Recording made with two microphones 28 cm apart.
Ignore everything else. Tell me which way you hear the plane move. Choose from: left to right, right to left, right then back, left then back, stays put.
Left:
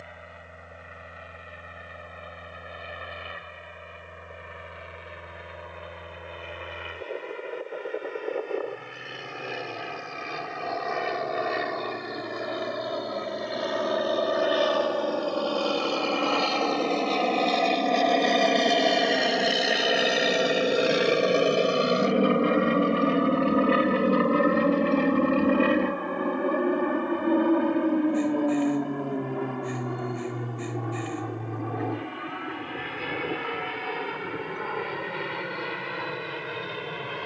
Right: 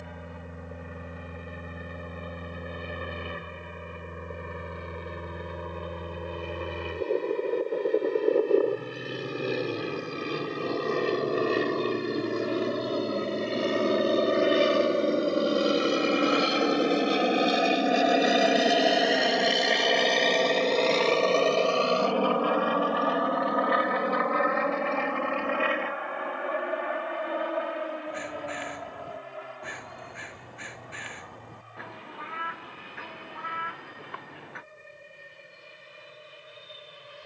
right to left.